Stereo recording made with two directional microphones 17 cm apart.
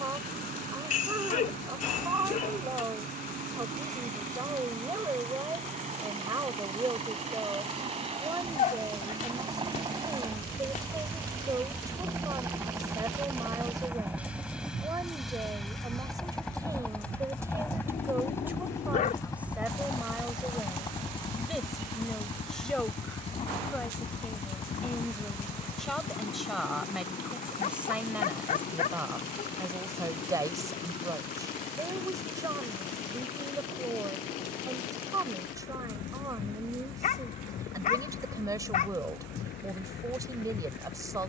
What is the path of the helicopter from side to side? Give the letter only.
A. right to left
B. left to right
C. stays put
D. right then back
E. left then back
A.